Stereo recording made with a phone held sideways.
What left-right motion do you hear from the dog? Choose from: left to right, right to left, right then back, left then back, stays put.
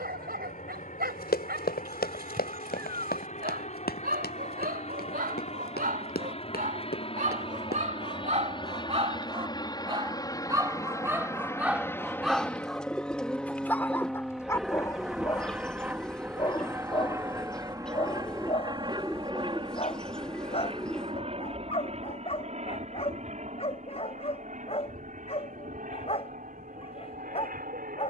right to left.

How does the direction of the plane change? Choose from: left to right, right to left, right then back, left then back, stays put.
left to right.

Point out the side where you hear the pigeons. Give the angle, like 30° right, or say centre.
centre.